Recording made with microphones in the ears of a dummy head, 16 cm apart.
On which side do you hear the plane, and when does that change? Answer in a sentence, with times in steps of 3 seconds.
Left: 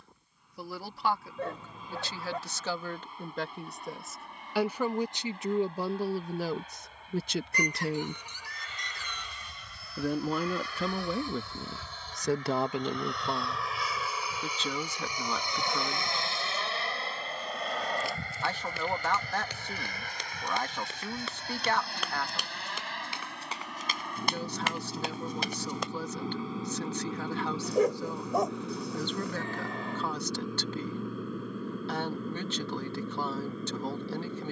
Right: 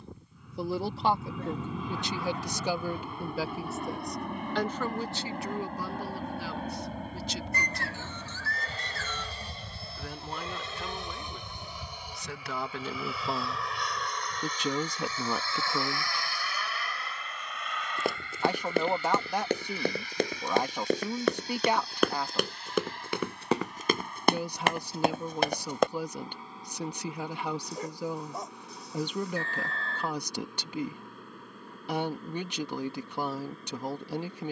In this clip you hear the plane on the right from 0 s, in the centre from 12 s and on the left from 15 s.